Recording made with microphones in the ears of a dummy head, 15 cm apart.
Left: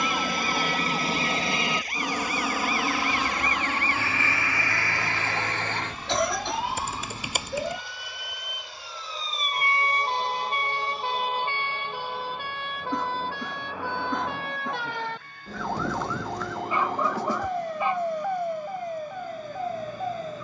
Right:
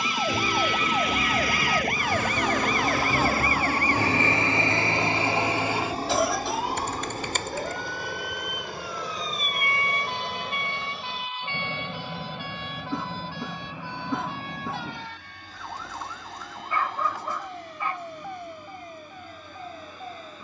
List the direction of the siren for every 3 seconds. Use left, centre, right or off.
right, right, centre, left, left, left, left.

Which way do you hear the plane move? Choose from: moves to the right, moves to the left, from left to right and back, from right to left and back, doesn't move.
moves to the right.